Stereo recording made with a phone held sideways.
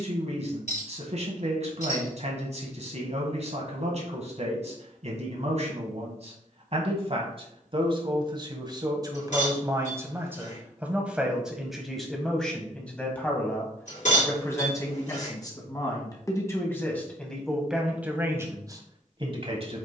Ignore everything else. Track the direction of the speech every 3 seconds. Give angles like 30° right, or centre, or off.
60° right, 60° right, 40° right, 10° right, 10° left, 20° left, 30° right.